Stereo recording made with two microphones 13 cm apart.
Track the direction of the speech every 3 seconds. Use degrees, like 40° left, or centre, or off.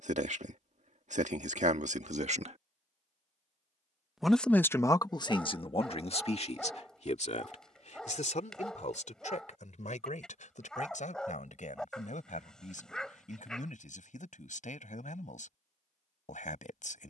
70° right, 30° left, 60° left, 70° left, 70° left, 70° left.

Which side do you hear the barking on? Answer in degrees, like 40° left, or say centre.
centre.